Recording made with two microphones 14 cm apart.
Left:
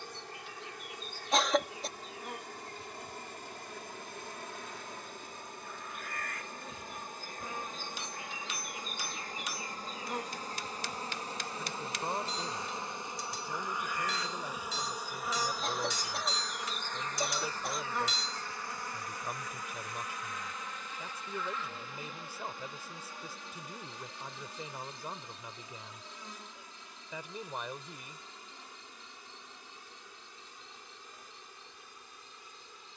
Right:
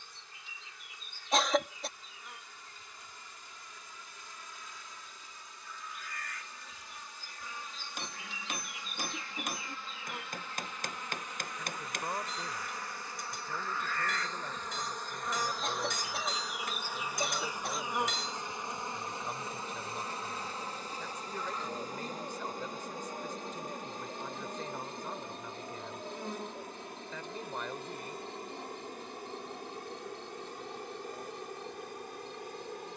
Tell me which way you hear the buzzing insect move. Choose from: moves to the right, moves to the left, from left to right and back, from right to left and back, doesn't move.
moves to the right.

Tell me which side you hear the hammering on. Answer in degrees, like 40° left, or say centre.
50° right.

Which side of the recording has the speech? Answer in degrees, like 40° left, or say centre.
10° left.